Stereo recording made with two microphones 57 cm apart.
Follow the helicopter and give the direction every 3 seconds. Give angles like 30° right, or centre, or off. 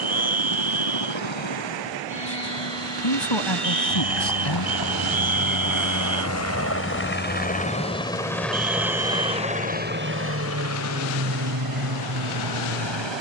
60° left, 40° left, 10° left, 20° right, 50° right.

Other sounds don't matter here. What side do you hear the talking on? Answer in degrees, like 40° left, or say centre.
50° left.